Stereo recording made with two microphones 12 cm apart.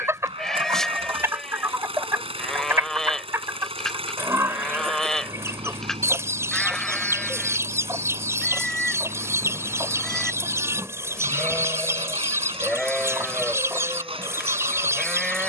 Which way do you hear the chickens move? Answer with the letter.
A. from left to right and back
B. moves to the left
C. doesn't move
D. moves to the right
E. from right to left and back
C.